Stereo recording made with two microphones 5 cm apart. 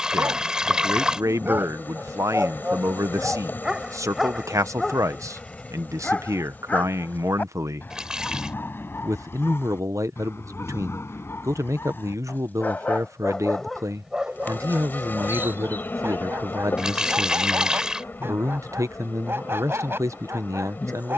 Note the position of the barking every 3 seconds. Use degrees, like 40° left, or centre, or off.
40° right, centre, 30° left, 50° left, 10° left, 50° right, 50° right.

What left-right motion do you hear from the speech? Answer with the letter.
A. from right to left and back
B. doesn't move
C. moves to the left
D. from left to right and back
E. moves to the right
B.